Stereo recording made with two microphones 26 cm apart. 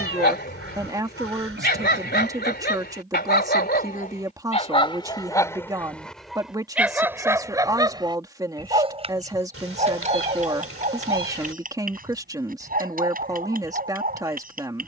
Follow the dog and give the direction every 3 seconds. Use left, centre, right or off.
left, left, centre, right, right.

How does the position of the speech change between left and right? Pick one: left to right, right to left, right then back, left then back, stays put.
stays put.